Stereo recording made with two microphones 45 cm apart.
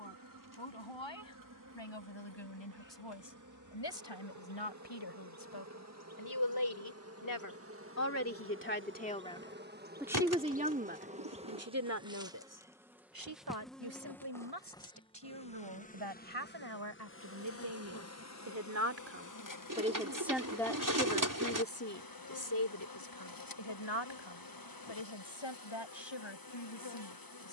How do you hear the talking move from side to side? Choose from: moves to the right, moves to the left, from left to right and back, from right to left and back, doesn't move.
from left to right and back.